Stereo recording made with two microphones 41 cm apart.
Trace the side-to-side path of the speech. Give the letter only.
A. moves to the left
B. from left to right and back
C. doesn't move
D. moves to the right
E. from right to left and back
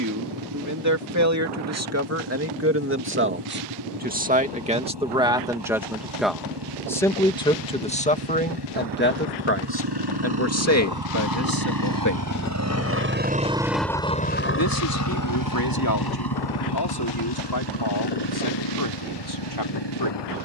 A.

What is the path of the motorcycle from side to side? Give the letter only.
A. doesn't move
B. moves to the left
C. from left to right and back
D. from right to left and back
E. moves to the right
B.